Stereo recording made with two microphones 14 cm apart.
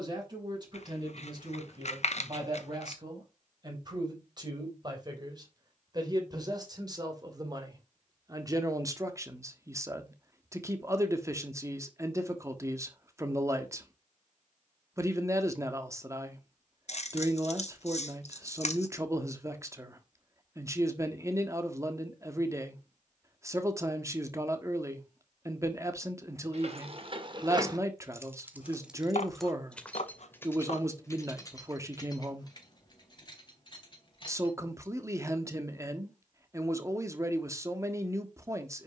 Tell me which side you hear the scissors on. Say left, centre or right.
left.